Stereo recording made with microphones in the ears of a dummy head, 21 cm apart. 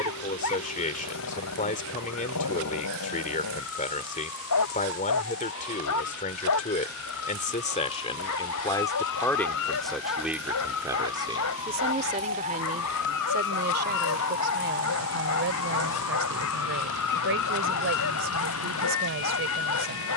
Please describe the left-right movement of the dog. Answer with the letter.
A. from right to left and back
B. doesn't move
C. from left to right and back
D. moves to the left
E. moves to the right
B.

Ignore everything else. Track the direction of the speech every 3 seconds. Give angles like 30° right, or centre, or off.
30° left, 30° left, 30° left, 10° right, 40° right, 60° right, 60° right.